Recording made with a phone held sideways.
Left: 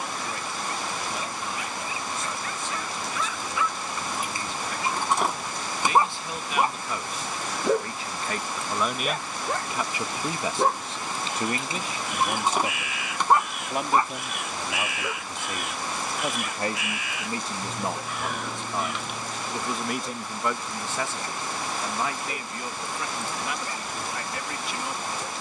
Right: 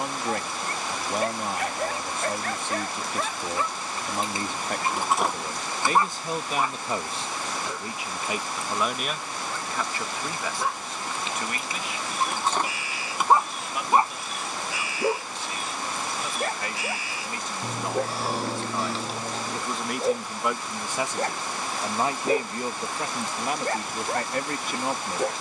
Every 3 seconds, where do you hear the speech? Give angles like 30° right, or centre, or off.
60° right, 50° right, 20° right, 20° left, 50° left, 40° left, centre, 40° right, 50° right.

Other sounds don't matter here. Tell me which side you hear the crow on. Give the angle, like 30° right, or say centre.
30° right.